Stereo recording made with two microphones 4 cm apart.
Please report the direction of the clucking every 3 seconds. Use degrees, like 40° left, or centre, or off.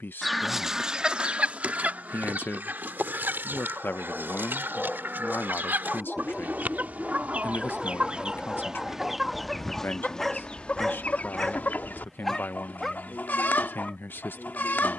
30° right, 60° right, 30° right, 20° left, 50° left.